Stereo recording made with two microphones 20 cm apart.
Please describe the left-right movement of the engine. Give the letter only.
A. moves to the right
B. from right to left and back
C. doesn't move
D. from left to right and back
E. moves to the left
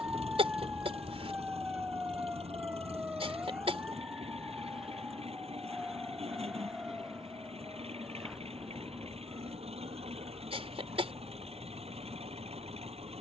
C.